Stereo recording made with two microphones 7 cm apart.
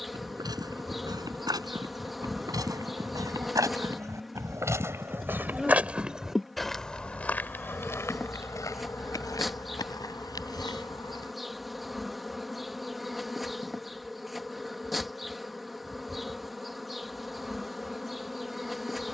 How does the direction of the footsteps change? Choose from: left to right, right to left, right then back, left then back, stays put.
right to left.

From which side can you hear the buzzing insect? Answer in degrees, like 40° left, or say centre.
centre.